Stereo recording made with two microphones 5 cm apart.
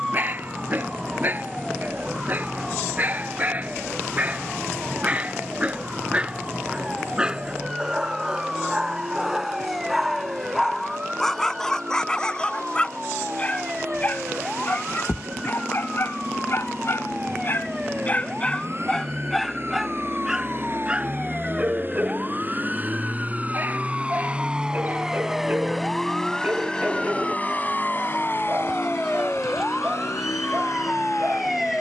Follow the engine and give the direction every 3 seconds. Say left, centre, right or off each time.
right, right, right, right, right, right, right, right, centre, left, left.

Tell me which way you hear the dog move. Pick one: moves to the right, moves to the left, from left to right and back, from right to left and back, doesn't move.
from right to left and back.